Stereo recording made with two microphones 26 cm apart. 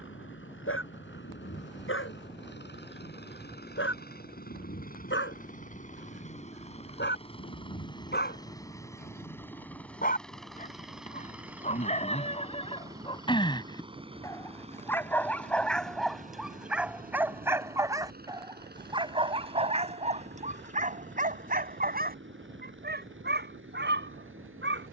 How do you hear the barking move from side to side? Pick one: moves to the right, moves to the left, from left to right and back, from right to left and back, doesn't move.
moves to the right.